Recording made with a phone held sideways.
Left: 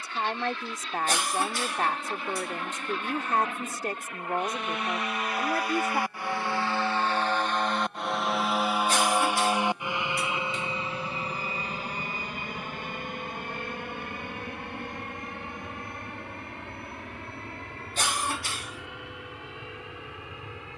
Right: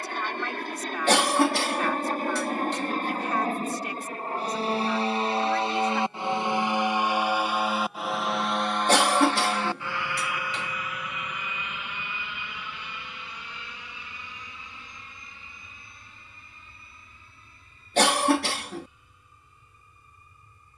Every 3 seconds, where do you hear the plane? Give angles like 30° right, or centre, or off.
50° right, 40° right, 10° right, 20° left, 50° left, 60° left, 70° left.